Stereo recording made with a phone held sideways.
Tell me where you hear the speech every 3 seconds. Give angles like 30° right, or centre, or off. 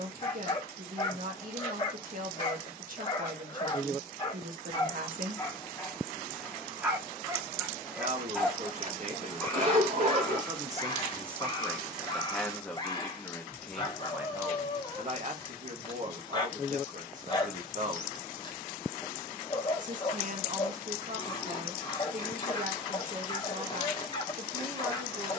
60° right, 60° right, 50° right, 20° right, centre, 50° right, 50° right, 50° right, 50° right.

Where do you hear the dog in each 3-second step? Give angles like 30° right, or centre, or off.
30° left, 30° left, 10° right, 20° left, 30° left, 30° left, 30° left, 30° left, 30° left.